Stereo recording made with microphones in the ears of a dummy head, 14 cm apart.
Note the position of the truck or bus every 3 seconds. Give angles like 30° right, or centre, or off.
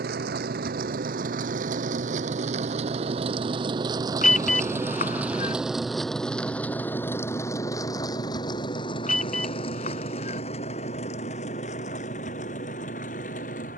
50° right, 20° right, 20° left, 40° left, 50° left.